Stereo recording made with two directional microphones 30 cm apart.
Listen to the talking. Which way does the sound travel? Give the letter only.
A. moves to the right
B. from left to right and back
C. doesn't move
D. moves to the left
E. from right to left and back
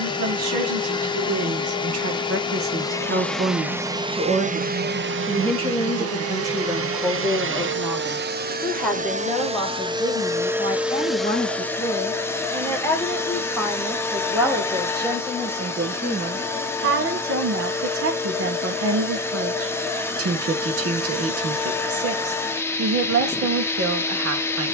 E.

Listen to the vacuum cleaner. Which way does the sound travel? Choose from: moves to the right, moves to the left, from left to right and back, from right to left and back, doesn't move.
from left to right and back.